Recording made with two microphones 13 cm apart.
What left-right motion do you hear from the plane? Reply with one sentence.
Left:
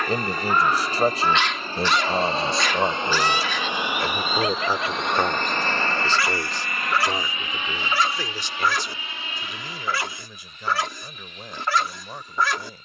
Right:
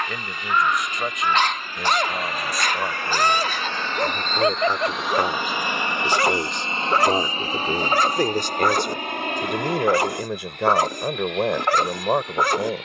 You can hear the plane travel towards the right.